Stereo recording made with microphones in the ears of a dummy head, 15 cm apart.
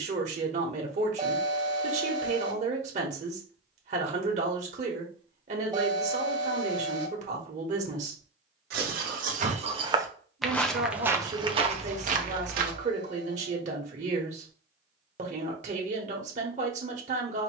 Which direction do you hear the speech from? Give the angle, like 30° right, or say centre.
40° right.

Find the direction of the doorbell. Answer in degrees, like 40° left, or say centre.
20° right.